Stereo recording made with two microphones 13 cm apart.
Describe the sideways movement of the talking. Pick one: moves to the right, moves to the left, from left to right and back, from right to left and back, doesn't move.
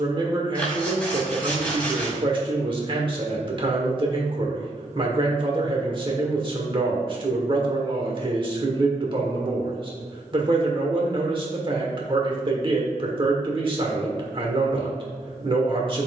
doesn't move.